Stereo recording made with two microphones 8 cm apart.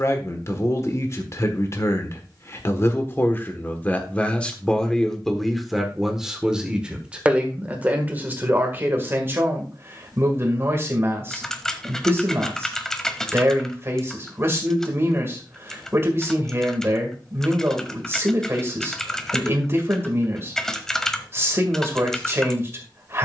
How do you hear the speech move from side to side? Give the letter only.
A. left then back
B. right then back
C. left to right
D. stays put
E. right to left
C.